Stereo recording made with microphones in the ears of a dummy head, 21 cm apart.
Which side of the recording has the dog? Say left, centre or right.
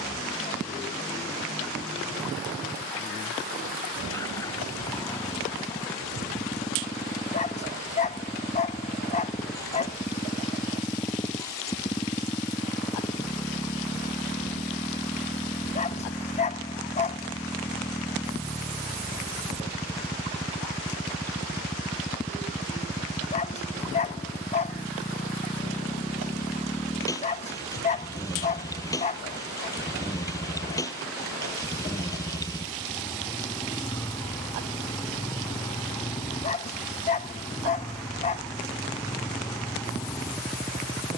left.